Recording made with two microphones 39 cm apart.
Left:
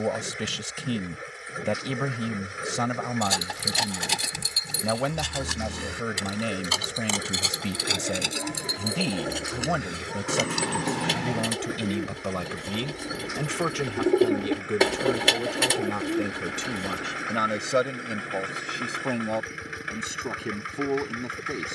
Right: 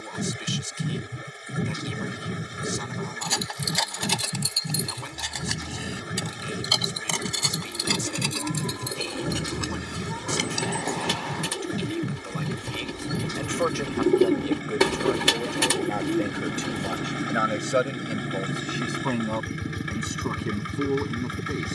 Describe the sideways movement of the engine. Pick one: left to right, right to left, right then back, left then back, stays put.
stays put.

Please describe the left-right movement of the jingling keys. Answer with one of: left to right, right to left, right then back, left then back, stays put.
right then back.